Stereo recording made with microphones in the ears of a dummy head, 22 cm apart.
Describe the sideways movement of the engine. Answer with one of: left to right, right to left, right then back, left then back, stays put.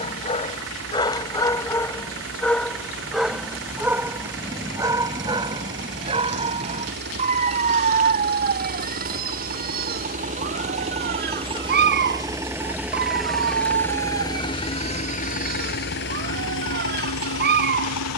right to left.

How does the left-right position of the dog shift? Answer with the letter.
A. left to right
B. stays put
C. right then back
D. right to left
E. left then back
A.